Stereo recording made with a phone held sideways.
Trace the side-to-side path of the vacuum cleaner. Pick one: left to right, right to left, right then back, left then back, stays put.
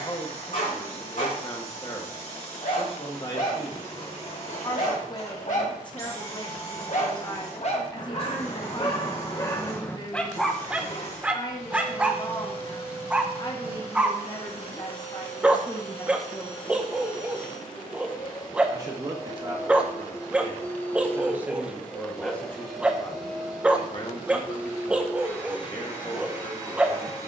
left to right.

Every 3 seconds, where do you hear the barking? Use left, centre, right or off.
left, left, left, centre, centre, centre, centre, centre, centre.